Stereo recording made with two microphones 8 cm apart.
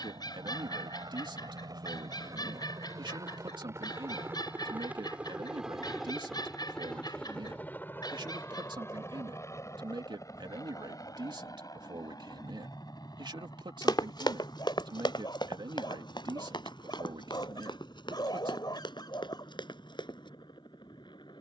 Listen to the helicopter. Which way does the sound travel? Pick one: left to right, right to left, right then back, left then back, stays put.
right to left.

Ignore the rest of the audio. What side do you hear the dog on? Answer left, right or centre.
left.